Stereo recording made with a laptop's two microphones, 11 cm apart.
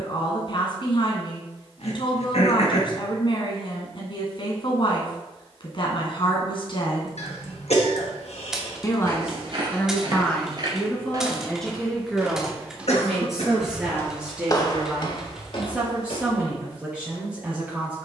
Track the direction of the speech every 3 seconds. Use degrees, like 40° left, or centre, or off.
50° left, 50° left, 50° left, 10° left, centre, 10° right.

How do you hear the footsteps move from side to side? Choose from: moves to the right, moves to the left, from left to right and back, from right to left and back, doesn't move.
moves to the left.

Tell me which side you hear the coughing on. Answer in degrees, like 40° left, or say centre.
80° left.